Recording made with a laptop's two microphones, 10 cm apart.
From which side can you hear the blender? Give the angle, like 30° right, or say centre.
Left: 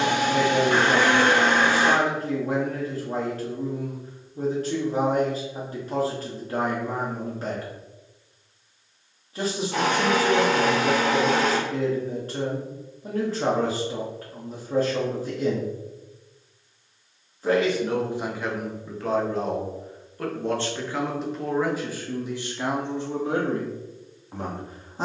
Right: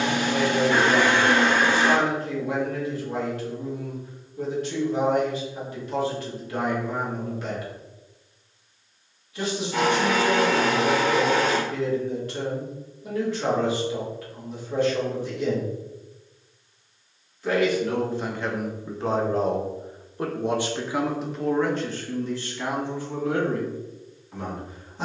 60° left.